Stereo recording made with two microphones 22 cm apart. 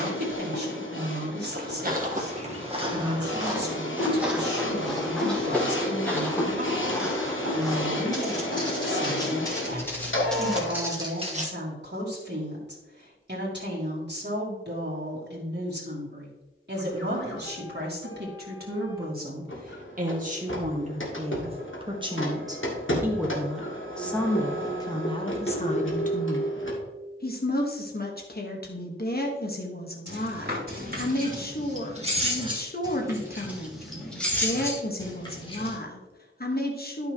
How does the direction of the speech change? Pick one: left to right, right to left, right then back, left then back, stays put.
right to left.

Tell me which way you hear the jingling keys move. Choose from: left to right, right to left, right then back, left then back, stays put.
right to left.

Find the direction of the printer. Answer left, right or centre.
left.